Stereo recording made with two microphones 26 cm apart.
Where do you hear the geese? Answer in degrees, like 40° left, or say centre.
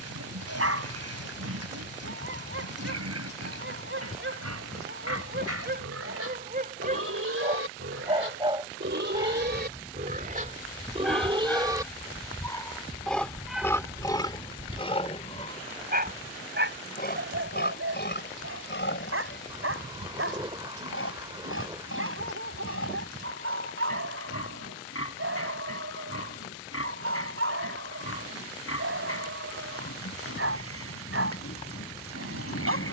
20° right.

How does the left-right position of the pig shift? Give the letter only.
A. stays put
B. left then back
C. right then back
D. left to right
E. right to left
E.